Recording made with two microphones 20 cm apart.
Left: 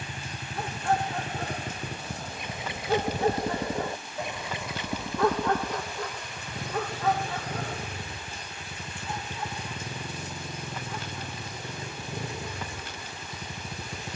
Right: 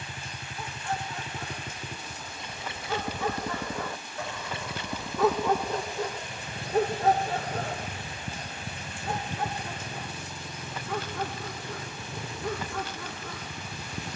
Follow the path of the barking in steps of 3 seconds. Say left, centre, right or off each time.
left, centre, right, right, right.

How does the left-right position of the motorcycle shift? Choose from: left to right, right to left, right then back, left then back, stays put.
stays put.